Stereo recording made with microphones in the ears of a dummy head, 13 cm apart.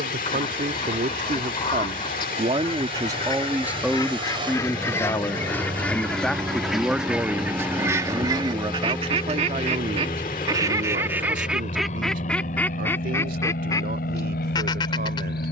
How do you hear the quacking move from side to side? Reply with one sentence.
You can hear the quacking move from left to right and back again.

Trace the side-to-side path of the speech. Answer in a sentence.
You can hear the speech go left and come back.